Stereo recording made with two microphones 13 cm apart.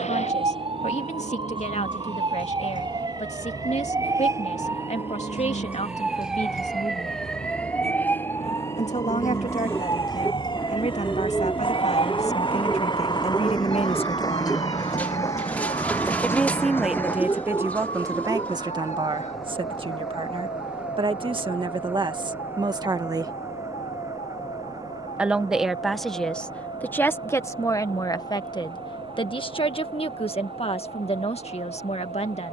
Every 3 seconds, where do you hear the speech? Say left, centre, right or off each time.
left, left, left, left, left, centre, right, right, centre, left, left.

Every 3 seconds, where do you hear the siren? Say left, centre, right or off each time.
right, right, centre, left, left, left, left, left, left, left, left.